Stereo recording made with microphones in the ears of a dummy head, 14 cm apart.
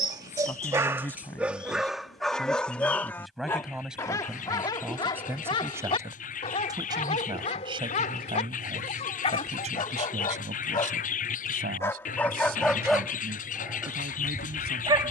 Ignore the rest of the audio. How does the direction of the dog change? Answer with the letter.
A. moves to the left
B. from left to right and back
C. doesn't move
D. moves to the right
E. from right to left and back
E.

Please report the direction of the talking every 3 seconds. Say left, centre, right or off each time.
centre, centre, right, right, right.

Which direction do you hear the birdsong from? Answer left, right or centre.
left.